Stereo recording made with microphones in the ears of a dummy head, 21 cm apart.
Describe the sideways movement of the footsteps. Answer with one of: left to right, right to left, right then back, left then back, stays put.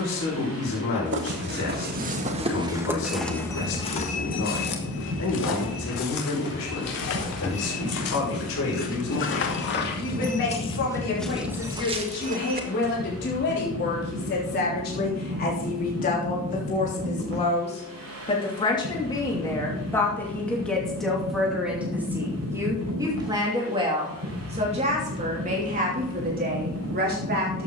left then back.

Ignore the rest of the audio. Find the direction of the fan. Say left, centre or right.
right.